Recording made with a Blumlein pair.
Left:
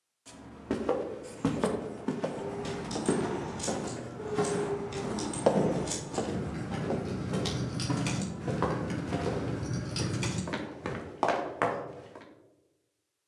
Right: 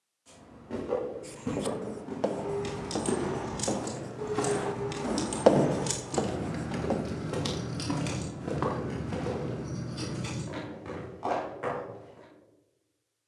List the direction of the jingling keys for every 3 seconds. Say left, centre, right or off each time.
right, right, centre, left, off.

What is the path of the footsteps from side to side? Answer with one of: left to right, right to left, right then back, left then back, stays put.
right then back.